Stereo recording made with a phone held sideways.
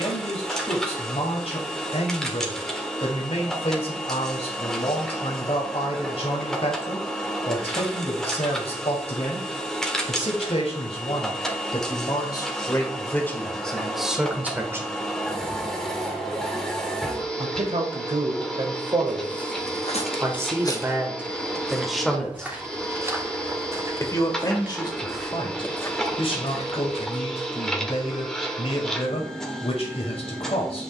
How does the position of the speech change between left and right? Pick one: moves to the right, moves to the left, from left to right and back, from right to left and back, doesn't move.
from left to right and back.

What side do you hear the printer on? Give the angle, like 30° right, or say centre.
centre.